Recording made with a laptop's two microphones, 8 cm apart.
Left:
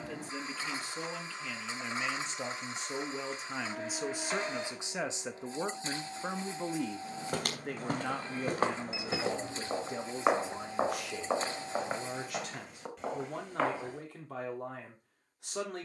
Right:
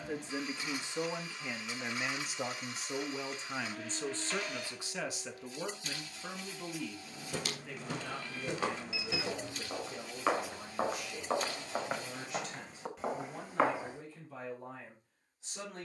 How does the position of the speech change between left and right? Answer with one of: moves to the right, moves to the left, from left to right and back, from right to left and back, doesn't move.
moves to the left.